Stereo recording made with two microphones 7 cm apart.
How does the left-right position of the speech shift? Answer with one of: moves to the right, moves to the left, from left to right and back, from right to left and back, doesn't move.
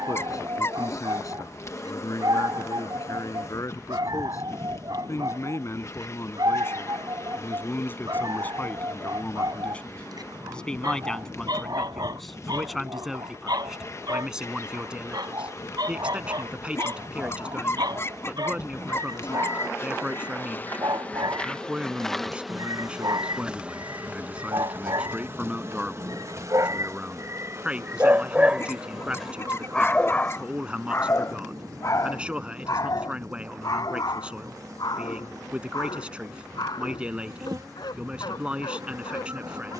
moves to the right.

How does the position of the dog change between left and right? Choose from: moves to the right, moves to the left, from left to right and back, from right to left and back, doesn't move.
moves to the left.